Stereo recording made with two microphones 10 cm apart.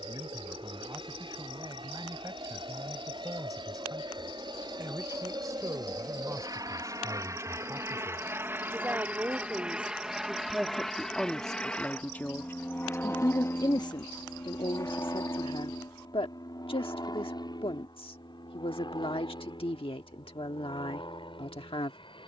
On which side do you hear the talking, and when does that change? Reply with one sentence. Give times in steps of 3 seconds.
In this clip you hear the talking on the right from 0 s, in the centre from 9 s and on the left from 12 s.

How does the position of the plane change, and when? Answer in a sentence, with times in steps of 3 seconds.
You can hear the plane on the right from 0 s, in the centre from 9 s and on the left from 12 s.